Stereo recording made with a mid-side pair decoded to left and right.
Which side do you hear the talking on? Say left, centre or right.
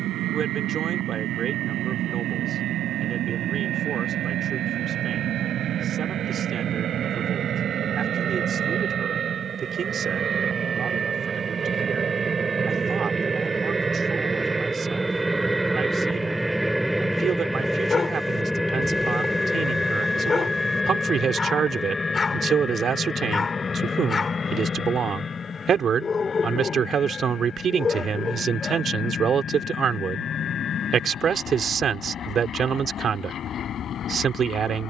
right.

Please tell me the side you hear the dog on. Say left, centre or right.
left.